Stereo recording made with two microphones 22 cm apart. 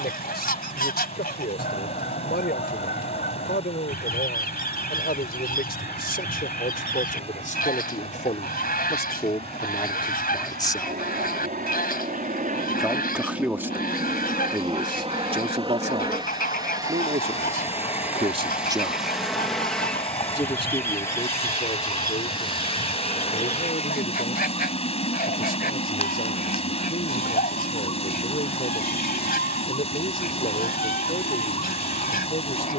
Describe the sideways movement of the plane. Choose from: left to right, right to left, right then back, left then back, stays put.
right to left.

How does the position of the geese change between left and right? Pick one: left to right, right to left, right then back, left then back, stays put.
stays put.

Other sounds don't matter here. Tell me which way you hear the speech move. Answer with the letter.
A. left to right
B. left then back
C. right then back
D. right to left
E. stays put
C.